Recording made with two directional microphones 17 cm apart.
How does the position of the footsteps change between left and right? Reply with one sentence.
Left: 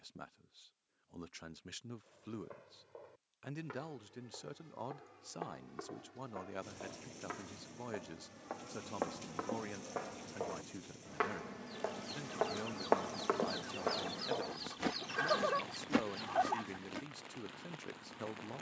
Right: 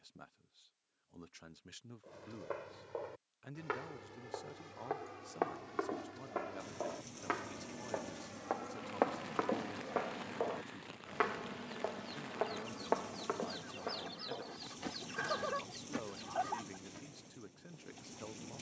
In this clip you hear the footsteps travel towards the left.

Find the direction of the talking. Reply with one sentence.
In this clip you hear the talking on the left.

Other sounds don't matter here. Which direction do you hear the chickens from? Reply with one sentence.
In this clip you hear the chickens on the left.